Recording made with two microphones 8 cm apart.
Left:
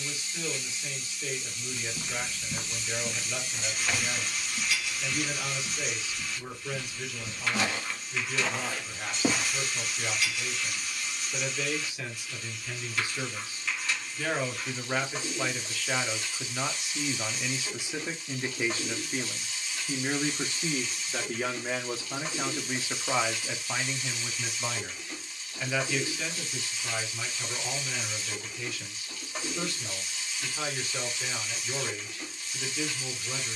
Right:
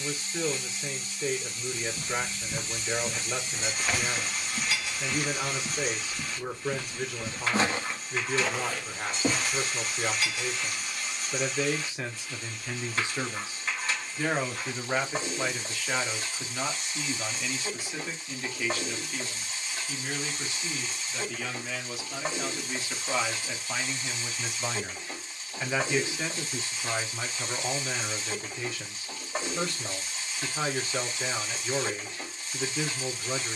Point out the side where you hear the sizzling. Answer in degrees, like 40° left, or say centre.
40° right.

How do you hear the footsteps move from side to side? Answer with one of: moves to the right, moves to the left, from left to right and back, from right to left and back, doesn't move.
from left to right and back.